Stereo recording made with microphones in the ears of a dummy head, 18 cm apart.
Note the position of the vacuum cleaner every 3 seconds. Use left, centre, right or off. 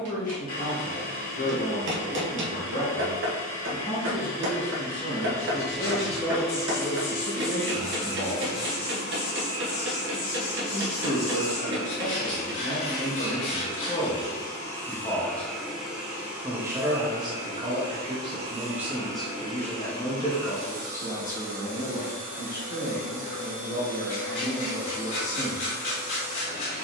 left, left, left, left, left, centre, right, right, right.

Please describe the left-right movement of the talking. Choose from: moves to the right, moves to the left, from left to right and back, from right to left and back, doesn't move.
from left to right and back.